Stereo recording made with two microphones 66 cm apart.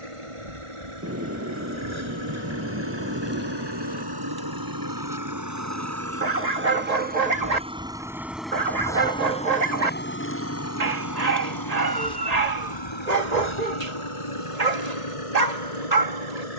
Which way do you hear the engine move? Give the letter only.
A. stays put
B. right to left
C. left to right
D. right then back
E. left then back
B.